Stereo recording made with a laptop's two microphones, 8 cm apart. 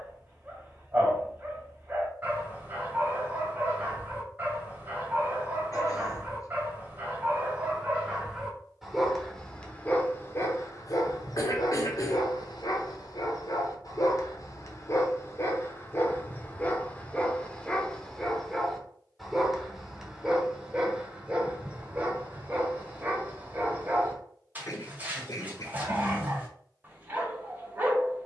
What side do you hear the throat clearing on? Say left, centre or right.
left.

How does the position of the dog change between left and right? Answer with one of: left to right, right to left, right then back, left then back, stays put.
left then back.